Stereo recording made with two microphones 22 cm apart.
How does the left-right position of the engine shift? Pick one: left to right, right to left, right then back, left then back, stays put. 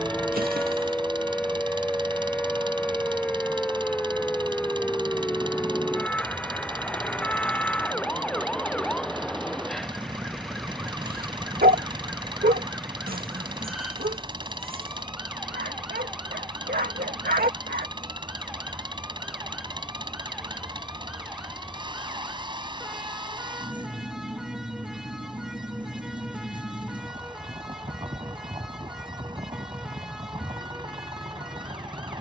stays put.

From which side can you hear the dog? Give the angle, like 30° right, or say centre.
40° right.